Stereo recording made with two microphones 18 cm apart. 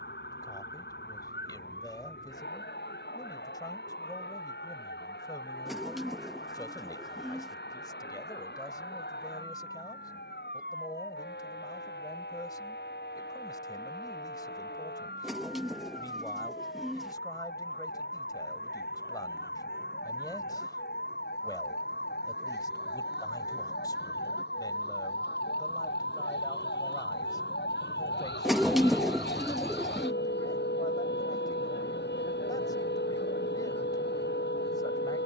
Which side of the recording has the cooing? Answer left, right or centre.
centre.